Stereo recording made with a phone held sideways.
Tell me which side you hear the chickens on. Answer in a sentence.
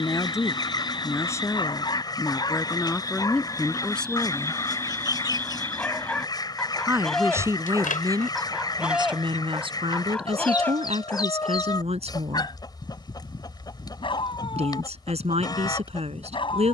You can hear the chickens on the left.